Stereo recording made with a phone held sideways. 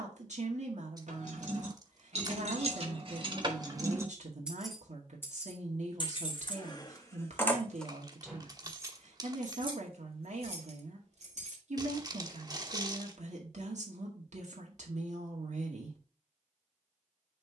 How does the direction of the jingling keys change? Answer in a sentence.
You can hear the jingling keys go left and come back.